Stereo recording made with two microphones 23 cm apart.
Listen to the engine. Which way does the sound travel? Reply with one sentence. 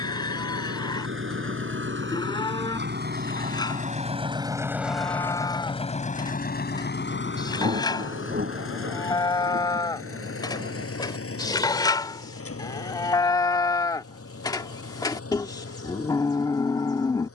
In this clip you hear the engine travel towards the left.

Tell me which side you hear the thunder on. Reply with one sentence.
You can hear the thunder on the right.